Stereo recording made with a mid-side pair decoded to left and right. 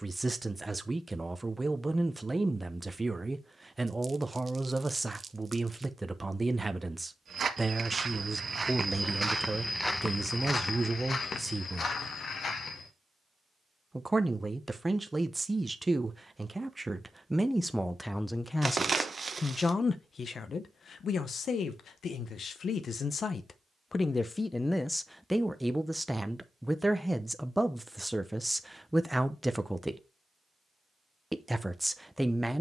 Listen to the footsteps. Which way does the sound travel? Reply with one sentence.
In this clip you hear the footsteps travel towards the left.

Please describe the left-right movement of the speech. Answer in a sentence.
In this clip you hear the speech move from right to left and back again.